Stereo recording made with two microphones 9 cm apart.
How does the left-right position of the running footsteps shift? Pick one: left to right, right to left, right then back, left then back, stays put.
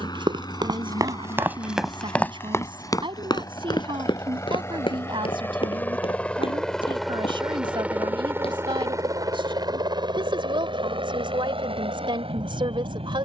right to left.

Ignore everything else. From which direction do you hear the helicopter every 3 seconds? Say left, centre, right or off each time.
left, left, centre, right, right.